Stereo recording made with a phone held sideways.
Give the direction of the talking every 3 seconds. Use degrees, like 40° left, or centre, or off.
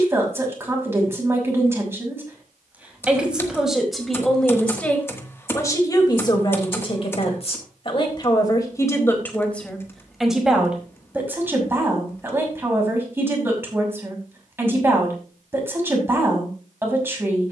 20° right, 10° left, 30° left, centre, 20° right, 20° right.